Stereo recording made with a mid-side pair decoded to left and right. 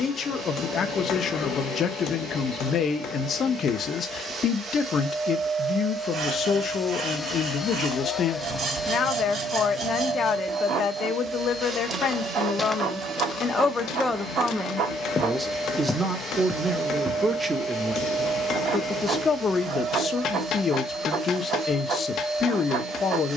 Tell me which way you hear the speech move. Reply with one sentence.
You can hear the speech move from left to right and back again.